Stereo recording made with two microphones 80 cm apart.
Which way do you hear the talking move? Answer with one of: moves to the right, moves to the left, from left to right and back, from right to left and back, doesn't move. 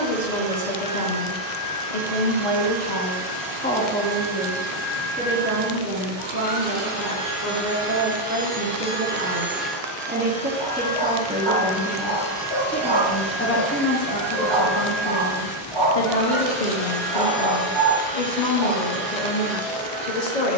from left to right and back.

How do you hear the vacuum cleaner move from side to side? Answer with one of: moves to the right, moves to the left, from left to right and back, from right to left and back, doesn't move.
moves to the left.